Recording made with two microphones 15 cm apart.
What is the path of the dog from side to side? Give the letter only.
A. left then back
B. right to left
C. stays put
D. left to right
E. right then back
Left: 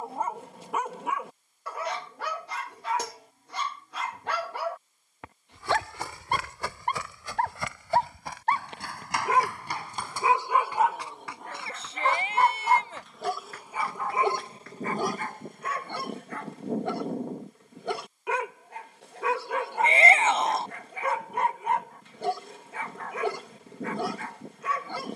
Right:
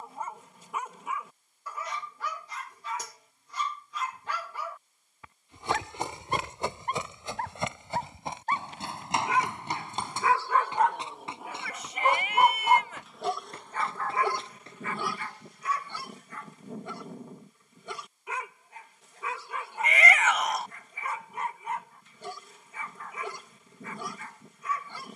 E.